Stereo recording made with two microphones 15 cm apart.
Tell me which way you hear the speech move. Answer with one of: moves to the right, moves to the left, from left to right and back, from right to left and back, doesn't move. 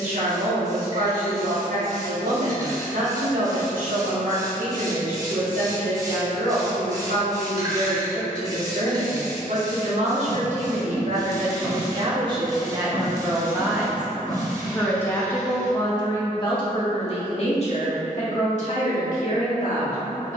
moves to the left.